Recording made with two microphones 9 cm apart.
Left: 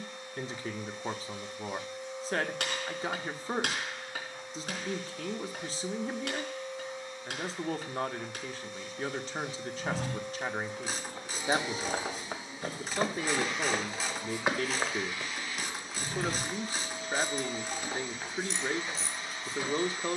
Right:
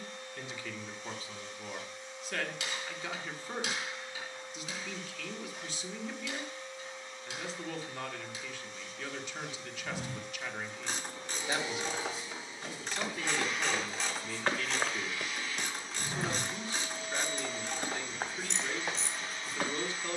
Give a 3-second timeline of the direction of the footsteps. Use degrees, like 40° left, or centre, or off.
off, off, off, 60° left, 30° left, 30° right, 50° right.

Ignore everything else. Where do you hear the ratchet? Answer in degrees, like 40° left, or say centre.
centre.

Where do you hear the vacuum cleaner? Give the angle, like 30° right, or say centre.
10° left.